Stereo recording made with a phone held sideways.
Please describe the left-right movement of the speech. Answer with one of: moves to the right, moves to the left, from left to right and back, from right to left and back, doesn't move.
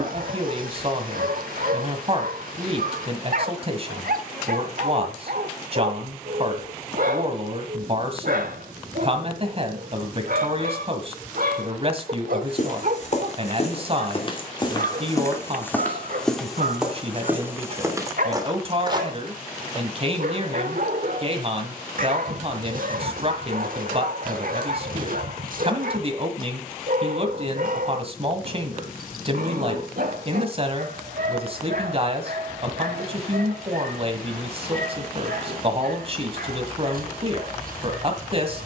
doesn't move.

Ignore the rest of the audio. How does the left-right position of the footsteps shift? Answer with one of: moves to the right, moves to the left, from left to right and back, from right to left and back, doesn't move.
moves to the right.